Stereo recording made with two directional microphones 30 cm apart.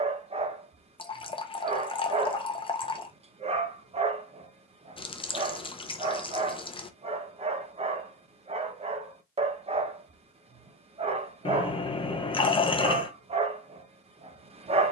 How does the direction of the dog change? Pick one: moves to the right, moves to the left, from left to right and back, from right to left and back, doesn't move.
doesn't move.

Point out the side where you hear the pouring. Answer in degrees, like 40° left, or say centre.
20° left.